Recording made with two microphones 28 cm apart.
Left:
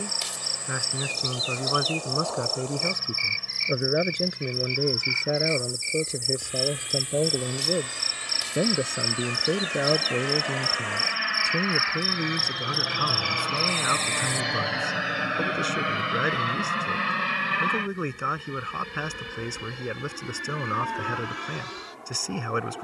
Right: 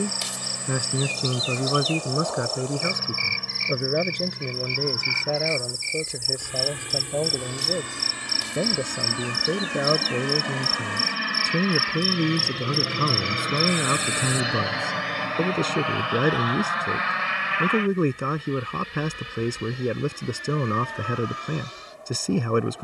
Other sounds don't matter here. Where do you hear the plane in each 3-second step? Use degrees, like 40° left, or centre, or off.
80° right, 70° right, 70° right, 50° right, 20° right, 30° left, 60° left, 70° left.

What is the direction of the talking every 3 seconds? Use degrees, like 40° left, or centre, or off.
30° right, 10° left, 20° left, 10° right, 40° right, 50° right, 50° right, 50° right.